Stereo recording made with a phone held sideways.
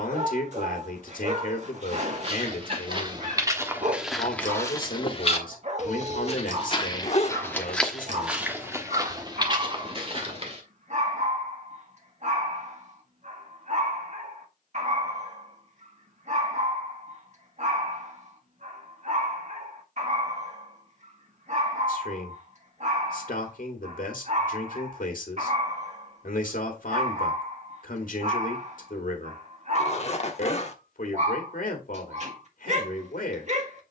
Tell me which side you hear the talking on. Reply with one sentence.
In this clip you hear the talking on the left.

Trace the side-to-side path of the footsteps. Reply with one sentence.
In this clip you hear the footsteps go left and come back.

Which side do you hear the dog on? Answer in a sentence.
In this clip you hear the dog on the right.